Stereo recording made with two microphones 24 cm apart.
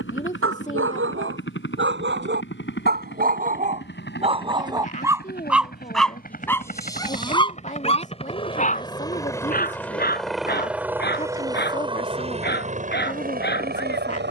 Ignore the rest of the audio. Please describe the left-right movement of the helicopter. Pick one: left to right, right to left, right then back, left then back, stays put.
left to right.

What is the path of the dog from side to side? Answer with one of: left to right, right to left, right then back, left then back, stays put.
right to left.